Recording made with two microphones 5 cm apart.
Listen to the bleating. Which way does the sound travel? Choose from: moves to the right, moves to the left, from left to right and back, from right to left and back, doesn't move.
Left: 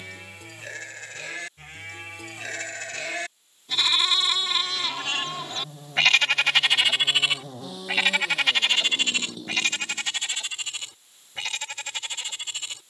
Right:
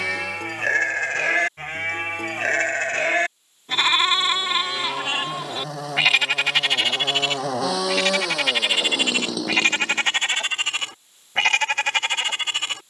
from right to left and back.